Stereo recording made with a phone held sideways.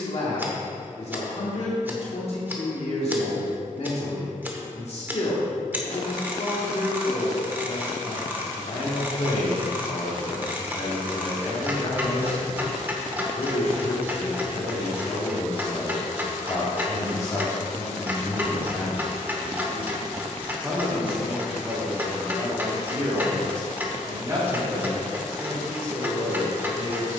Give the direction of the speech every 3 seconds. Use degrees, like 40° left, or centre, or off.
50° left, 50° left, 50° left, 50° left, 50° left, 30° left, centre, 20° right, 30° right.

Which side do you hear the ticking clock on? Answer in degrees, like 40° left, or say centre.
10° right.